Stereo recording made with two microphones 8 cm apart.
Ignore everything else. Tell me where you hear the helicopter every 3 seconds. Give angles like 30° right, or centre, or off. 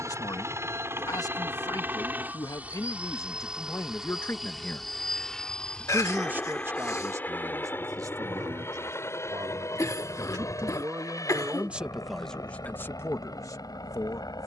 30° right, centre, 20° left, 40° left, 50° left.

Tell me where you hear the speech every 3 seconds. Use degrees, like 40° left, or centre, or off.
50° left, 30° left, 40° right, 40° right, 30° left.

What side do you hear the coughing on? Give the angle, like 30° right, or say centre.
40° left.